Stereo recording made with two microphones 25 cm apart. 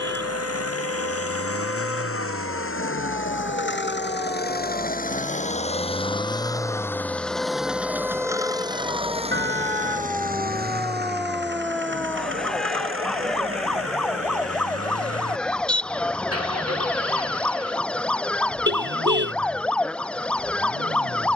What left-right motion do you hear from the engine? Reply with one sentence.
You can hear the engine move from left to right.